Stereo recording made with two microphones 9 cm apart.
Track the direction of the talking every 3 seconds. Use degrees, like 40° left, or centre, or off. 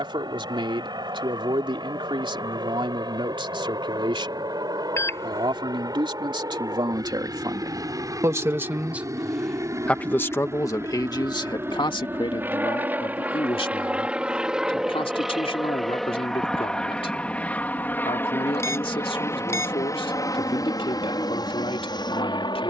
60° right, 60° right, 40° right, 30° left, 70° left, 70° left, 70° left, 70° left.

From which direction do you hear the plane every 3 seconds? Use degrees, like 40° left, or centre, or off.
50° right, 50° right, 40° right, 30° right, 10° right, 10° left, 30° left, 50° left.